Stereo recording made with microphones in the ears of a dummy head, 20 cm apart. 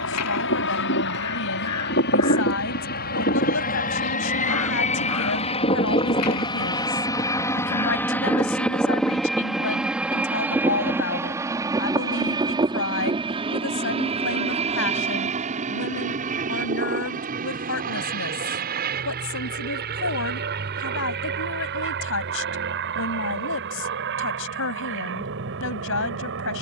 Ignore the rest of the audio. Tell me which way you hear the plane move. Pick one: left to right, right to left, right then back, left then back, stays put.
left to right.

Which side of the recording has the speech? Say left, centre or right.
left.